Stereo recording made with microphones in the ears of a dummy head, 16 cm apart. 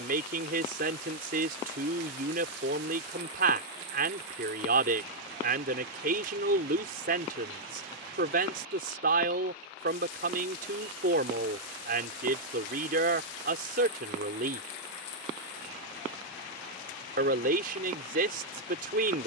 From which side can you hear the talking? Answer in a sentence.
In this clip you hear the talking on the right.